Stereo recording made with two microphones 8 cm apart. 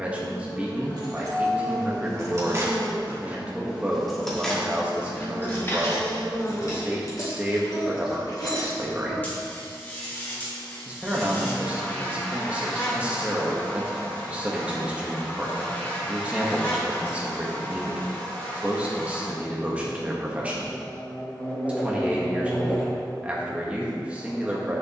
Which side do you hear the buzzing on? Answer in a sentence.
You can hear the buzzing on the left.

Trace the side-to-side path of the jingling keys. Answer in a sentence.
You can hear the jingling keys move to the left.